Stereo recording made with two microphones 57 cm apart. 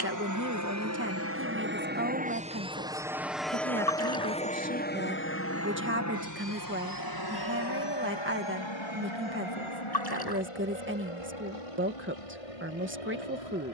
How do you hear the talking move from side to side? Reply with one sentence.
In this clip you hear the talking stay in one place.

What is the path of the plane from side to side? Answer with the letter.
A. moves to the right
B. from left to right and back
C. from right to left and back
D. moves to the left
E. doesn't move
D.